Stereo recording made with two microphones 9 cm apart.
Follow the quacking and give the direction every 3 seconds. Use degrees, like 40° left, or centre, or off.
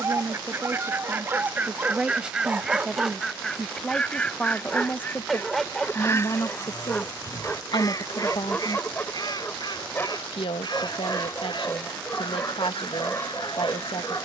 20° right, 10° left, 40° left, 50° left, 60° left.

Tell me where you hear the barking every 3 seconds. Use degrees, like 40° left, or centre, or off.
30° right, centre, 10° left, 20° left, 20° left.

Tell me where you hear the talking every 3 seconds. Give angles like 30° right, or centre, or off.
10° right, 10° left, 60° left, 80° left, 80° left.